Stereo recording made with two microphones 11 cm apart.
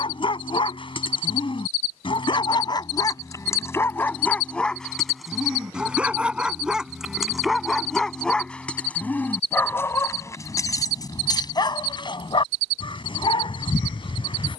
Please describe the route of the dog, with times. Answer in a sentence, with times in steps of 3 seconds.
You can hear the dog on the left from 0 s, in the centre from 3 s and on the left from 9 s.